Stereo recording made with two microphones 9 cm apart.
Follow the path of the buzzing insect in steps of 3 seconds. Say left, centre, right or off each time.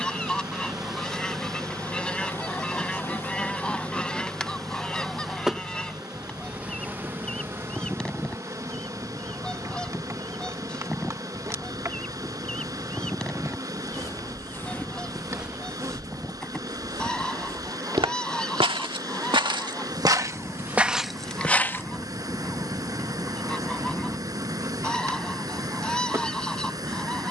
centre, centre, right, right, right, right, right, right, right.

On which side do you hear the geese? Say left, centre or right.
centre.